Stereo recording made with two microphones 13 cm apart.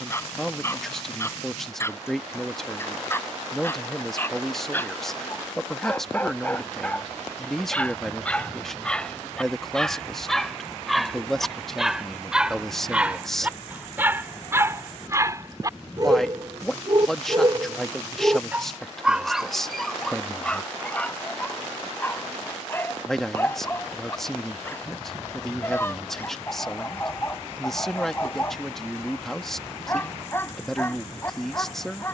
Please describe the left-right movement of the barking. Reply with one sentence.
You can hear the barking move from left to right and back again.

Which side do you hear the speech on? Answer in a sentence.
In this clip you hear the speech in the centre.